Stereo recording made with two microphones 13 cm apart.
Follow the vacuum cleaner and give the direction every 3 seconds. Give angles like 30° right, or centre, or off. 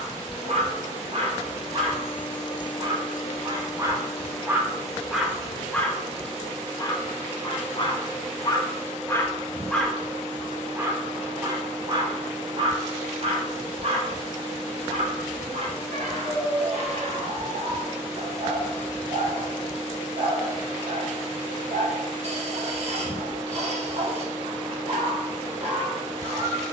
50° left, 20° left, 10° right, 30° right, 30° right, 30° right, 30° right, 30° right, 30° right.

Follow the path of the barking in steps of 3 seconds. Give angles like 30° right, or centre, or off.
50° right, 10° right, 30° left, 10° right, 50° right, 50° right, 50° right, 50° right, 50° right.